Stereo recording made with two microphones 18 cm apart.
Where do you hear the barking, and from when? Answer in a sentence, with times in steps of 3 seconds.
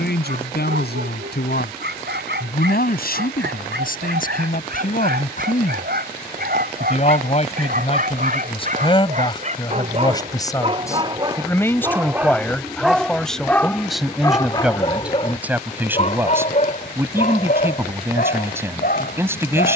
You can hear the barking on the right from 0 s, in the centre from 12 s and on the left from 15 s.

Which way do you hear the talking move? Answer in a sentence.
You can hear the talking move from left to right.